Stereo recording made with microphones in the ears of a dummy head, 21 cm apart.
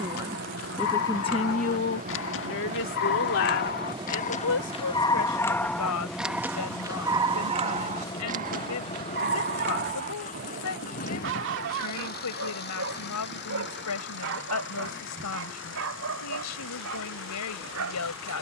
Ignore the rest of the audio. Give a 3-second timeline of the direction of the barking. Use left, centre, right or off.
left, left, right, right, right, right.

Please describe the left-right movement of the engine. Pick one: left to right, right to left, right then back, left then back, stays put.
right to left.